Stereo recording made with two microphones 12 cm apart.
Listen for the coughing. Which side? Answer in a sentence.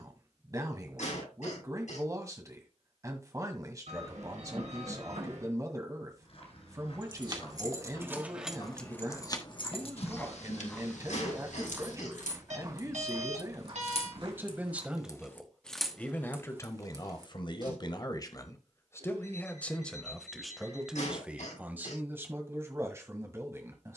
You can hear the coughing on the left.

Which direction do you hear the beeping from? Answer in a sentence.
In this clip you hear the beeping on the right.